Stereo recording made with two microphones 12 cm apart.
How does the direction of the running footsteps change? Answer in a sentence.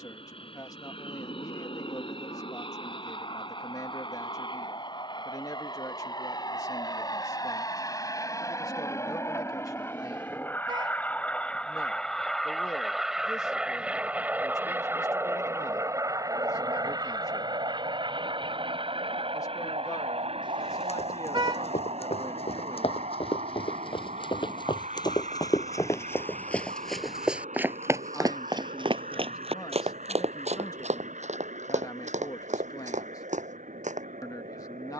You can hear the running footsteps travel towards the right.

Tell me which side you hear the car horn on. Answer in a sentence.
In this clip you hear the car horn on the right.